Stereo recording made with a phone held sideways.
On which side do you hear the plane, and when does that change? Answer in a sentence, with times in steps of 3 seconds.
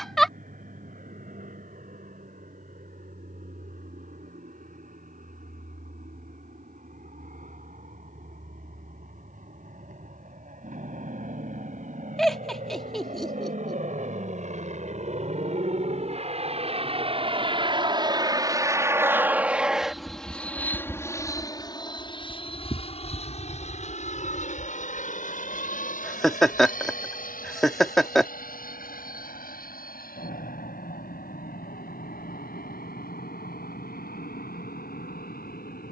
You can hear the plane on the right from 0 s, in the centre from 18 s and on the left from 21 s.